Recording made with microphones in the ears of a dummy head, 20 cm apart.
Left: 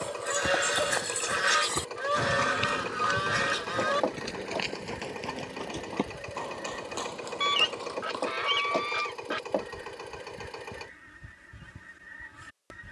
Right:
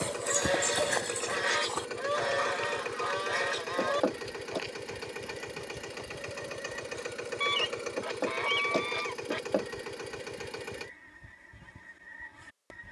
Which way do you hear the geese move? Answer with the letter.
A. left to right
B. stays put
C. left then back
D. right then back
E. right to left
B.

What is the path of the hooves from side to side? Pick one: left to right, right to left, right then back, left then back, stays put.
right to left.